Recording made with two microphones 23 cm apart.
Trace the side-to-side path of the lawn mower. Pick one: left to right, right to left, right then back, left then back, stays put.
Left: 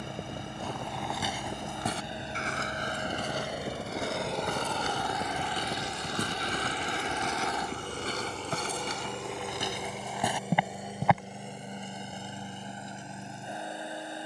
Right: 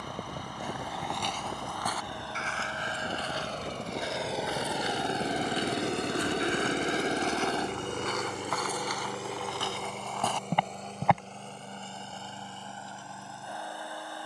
right then back.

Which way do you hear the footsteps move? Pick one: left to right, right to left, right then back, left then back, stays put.
left then back.